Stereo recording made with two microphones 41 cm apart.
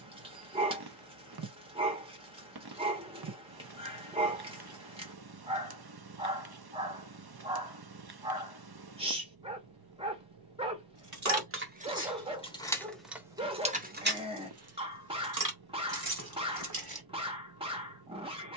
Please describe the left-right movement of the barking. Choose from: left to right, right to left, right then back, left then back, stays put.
stays put.